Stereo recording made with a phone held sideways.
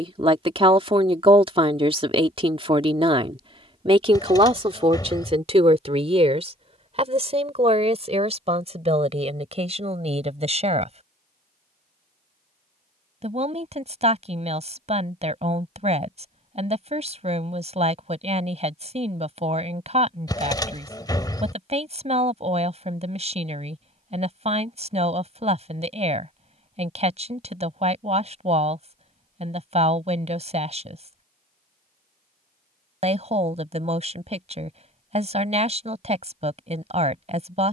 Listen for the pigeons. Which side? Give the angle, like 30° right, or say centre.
20° left.